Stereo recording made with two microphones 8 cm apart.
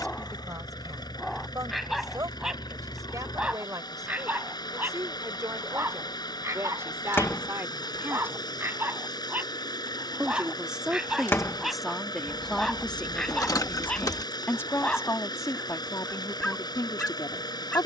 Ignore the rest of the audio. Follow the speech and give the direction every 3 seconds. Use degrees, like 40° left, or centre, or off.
50° right, 40° right, 30° right, 10° right, 20° left, 50° left.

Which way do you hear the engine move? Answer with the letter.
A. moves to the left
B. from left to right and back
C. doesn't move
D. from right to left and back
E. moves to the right
C.